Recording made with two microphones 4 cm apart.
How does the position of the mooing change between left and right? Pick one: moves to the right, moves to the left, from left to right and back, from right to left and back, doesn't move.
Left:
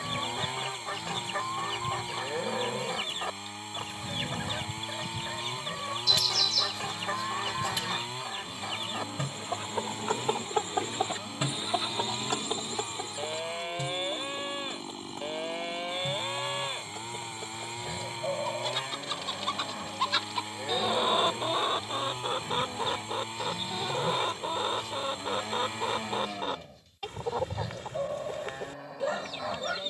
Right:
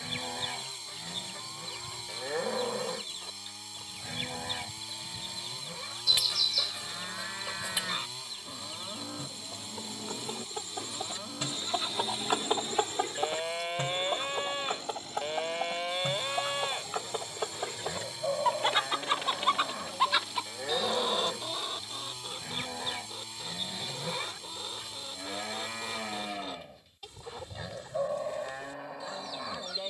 doesn't move.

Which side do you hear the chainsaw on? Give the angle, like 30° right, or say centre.
40° left.